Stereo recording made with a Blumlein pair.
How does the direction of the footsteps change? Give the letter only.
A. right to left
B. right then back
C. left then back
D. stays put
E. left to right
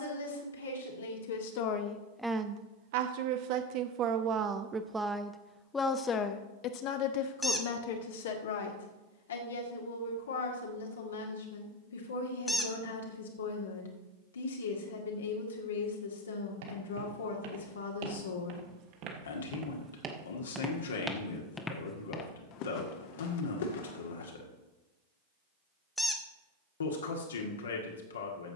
A.